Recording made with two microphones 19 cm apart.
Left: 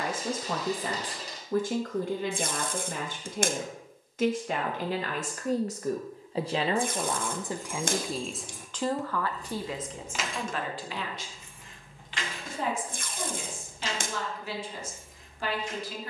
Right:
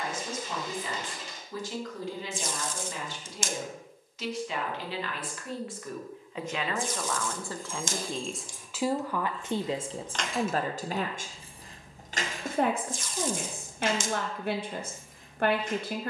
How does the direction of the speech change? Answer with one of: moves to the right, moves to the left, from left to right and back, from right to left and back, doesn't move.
moves to the right.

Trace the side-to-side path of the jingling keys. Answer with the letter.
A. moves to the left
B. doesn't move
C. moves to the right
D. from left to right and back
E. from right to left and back
C.